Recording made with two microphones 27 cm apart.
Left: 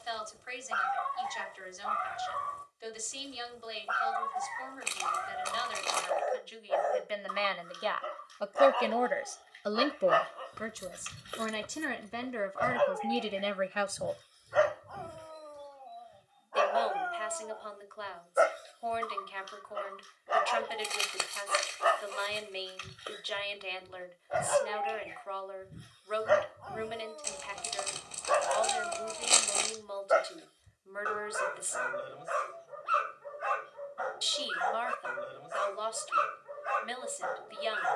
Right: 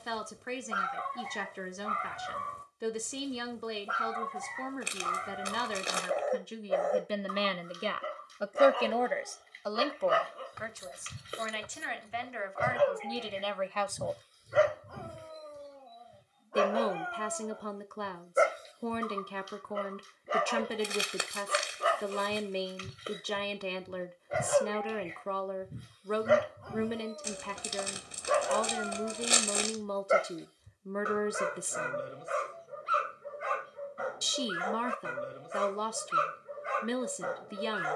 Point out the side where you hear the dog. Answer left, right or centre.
right.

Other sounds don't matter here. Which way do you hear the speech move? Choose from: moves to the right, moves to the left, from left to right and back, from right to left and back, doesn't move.
from right to left and back.